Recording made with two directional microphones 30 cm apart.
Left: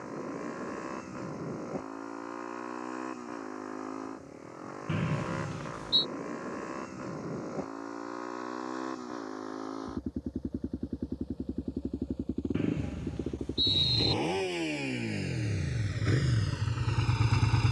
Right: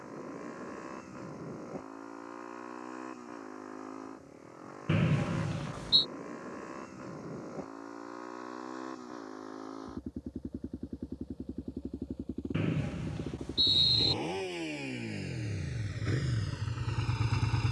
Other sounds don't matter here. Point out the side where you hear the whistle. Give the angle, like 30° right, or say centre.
20° right.